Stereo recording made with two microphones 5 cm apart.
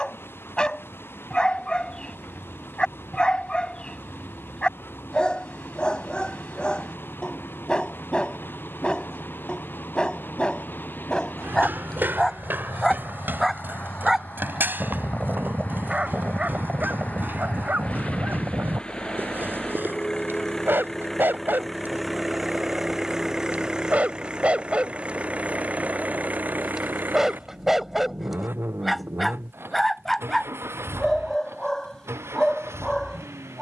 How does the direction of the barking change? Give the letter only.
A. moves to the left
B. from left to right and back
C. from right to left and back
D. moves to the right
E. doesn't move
B.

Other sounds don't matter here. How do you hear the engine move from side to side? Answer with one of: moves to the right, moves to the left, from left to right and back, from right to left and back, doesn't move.
moves to the right.